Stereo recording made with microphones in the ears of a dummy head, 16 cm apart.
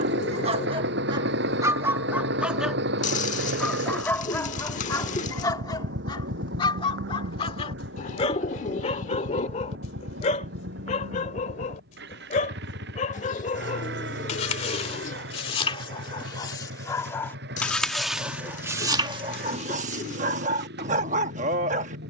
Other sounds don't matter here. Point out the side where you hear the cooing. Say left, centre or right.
left.